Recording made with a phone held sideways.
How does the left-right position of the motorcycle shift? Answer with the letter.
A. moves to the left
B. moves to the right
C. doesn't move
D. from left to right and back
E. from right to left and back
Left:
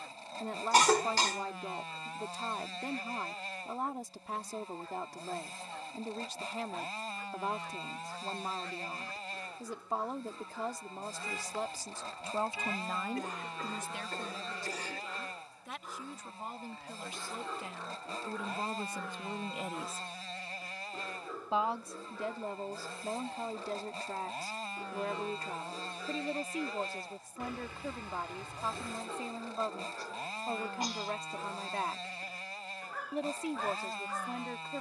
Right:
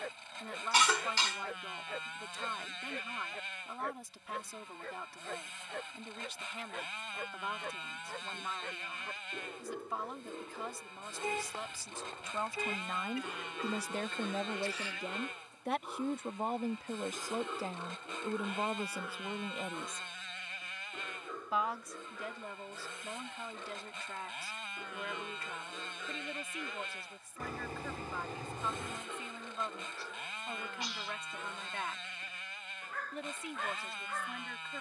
C.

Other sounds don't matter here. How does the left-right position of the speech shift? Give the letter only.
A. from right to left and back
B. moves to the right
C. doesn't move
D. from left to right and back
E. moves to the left
D.